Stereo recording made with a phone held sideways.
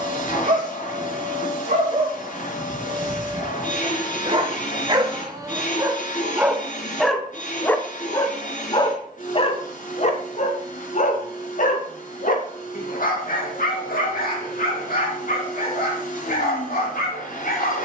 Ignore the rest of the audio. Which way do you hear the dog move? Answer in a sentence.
You can hear the dog go from the right side to the left.